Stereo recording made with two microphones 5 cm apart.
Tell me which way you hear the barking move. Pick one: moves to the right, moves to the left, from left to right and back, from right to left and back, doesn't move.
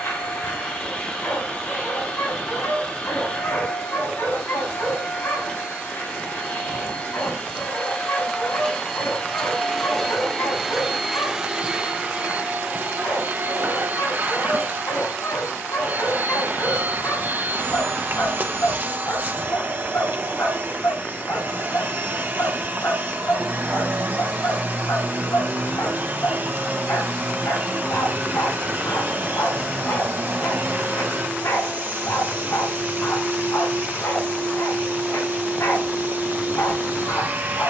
doesn't move.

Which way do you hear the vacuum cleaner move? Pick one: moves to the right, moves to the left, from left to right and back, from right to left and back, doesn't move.
moves to the right.